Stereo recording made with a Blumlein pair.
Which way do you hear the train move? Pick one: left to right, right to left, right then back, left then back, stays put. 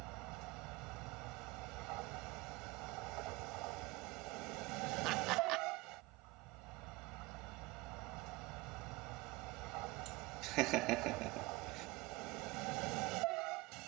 stays put.